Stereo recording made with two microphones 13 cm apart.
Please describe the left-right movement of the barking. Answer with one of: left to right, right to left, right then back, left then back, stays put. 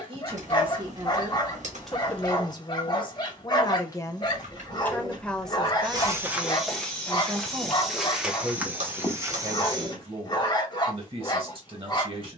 stays put.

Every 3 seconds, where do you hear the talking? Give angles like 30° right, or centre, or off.
10° right, 20° left, 20° right, 40° right.